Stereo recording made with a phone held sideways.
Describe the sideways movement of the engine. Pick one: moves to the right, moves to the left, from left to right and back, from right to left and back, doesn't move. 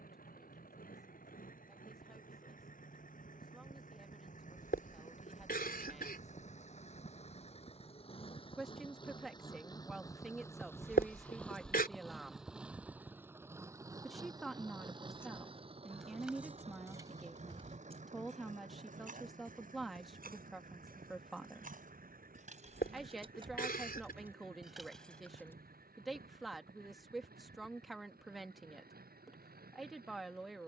moves to the right.